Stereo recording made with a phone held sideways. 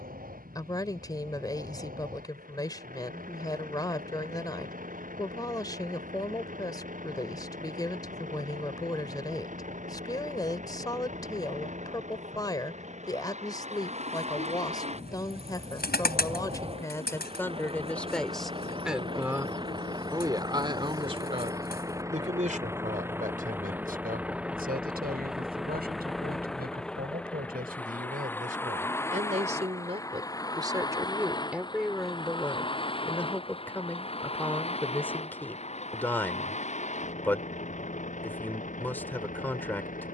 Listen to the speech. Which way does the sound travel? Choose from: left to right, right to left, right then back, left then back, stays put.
right then back.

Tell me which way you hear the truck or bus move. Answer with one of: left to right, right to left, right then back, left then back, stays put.
right to left.